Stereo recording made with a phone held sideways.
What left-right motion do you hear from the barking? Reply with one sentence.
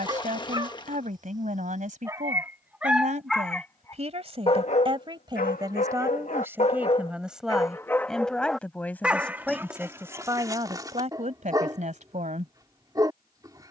You can hear the barking go left and come back.